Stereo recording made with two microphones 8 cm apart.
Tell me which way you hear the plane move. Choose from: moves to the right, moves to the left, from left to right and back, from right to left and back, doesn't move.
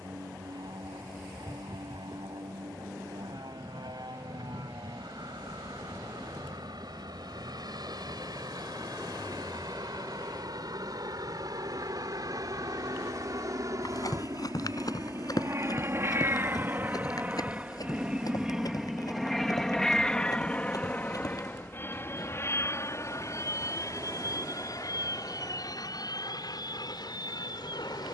moves to the left.